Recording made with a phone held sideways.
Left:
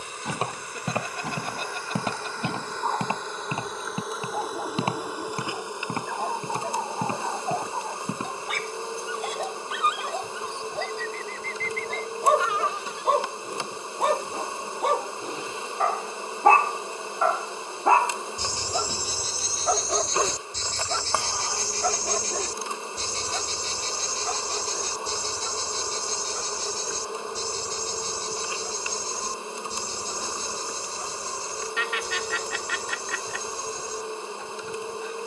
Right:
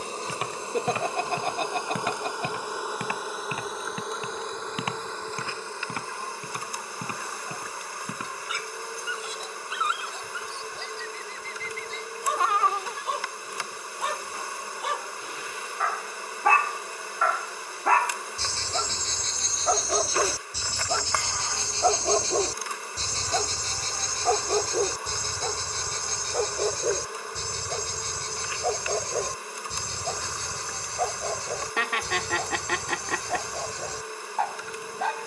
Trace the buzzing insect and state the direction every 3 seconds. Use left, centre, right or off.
right, centre, left, left, left, left, left, left, left, left, left, left.